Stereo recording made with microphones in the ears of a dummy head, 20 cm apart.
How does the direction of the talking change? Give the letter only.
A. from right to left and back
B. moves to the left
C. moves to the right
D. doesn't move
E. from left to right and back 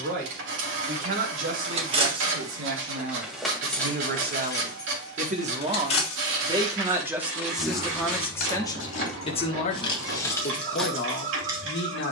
B.